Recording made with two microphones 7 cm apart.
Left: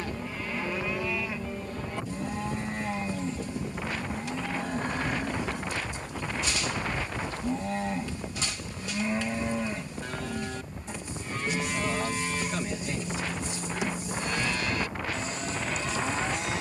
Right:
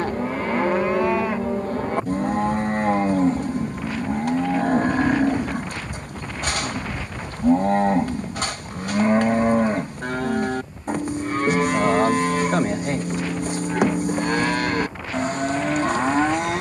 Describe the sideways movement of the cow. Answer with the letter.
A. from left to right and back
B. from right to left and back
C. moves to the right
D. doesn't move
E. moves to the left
D.